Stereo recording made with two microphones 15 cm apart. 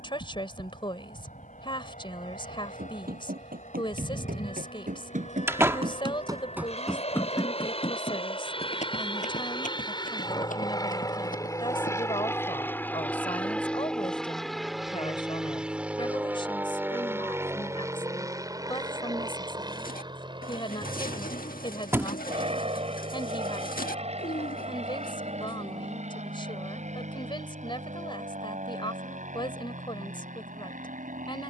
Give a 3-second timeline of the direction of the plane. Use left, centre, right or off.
left, left, left, left, centre, centre, right, right, right, right, right.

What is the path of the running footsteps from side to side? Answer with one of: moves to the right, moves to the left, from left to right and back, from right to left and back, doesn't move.
moves to the left.